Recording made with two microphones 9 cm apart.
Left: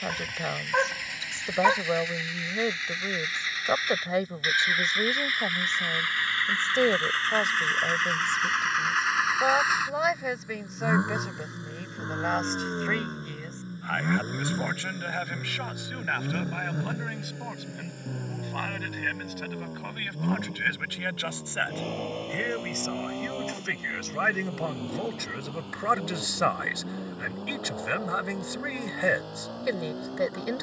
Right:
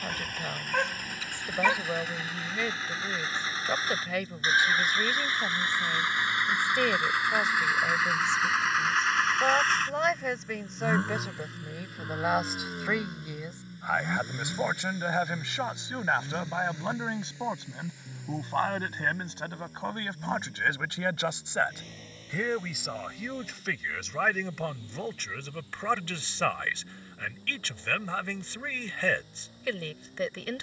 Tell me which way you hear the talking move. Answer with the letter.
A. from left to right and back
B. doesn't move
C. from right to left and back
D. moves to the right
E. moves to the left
A.